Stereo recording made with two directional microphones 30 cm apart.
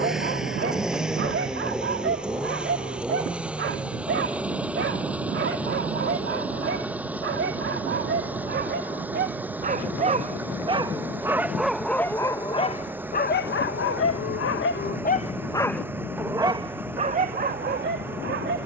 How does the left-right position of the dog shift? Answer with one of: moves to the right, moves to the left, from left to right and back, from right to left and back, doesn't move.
from right to left and back.